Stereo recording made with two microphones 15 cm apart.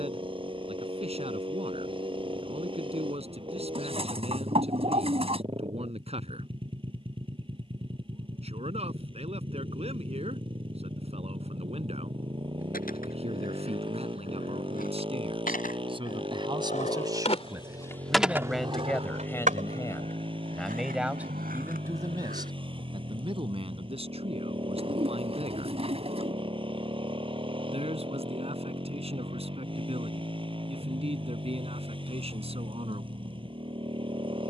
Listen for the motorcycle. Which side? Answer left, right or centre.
right.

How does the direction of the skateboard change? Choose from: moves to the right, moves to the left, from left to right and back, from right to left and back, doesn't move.
moves to the right.